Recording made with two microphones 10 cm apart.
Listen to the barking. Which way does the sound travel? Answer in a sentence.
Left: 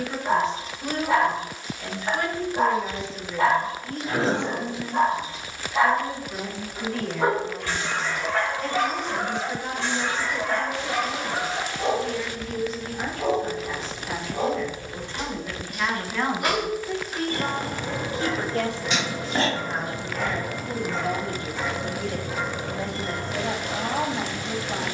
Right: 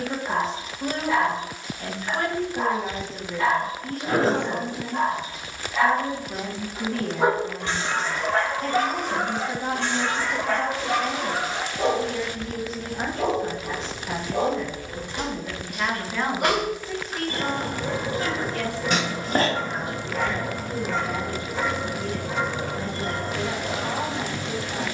In this clip you hear the barking travel towards the right.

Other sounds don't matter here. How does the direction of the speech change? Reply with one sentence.
In this clip you hear the speech travel towards the left.